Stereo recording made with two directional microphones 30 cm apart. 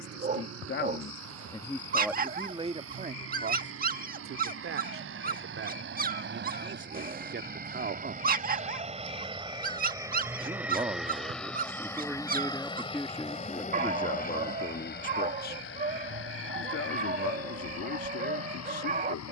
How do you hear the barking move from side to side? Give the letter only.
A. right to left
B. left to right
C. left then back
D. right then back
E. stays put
E.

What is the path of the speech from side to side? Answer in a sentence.
In this clip you hear the speech move from left to right and back again.